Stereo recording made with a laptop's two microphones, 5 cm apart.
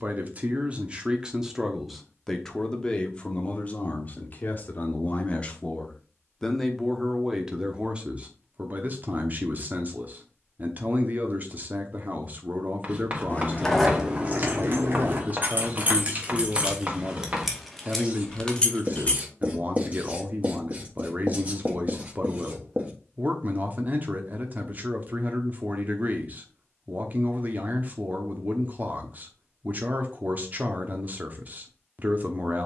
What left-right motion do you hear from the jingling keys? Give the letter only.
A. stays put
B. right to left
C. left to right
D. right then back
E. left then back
D.